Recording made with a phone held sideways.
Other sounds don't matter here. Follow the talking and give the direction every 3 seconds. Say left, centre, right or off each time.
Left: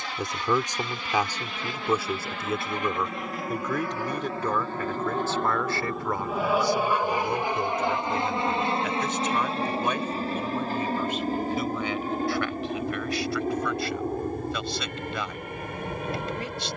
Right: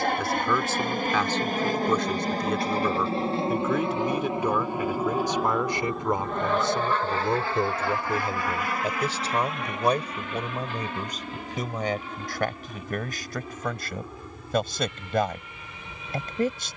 centre, centre, right, right, right, right.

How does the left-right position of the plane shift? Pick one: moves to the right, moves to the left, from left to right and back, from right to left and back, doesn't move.
moves to the left.